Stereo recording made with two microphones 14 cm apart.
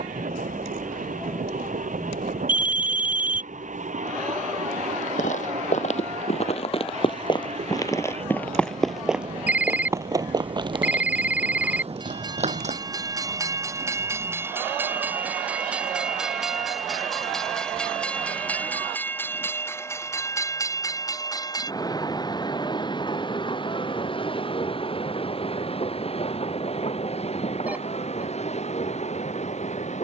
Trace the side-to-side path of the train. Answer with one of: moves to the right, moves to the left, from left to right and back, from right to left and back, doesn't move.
moves to the left.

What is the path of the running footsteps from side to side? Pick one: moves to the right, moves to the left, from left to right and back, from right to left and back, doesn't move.
moves to the right.